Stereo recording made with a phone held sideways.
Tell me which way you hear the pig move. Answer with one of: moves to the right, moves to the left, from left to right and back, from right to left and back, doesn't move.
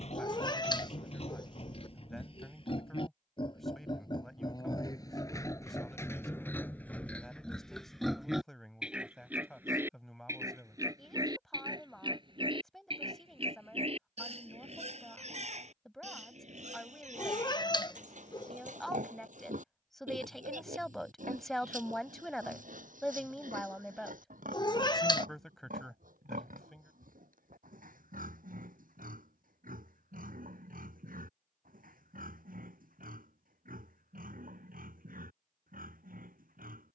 moves to the right.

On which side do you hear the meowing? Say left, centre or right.
left.